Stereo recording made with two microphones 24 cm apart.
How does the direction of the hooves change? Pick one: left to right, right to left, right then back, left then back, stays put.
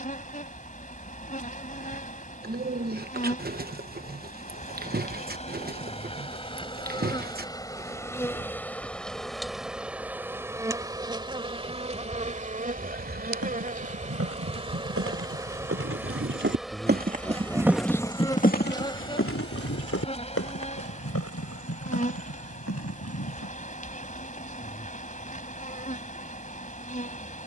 right to left.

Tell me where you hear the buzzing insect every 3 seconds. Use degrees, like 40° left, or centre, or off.
30° left, 30° left, 20° left, 10° right, 30° right, centre, 20° left, 30° left, 30° left.